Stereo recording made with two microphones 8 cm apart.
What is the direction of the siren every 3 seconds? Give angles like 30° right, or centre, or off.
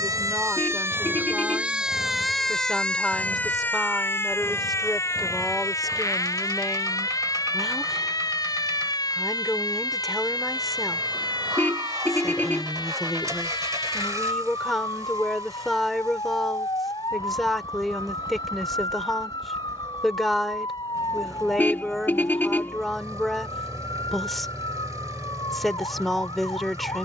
20° right, 30° left, 50° left, 60° left, 60° left, 60° left, 60° left, 60° left, 70° left.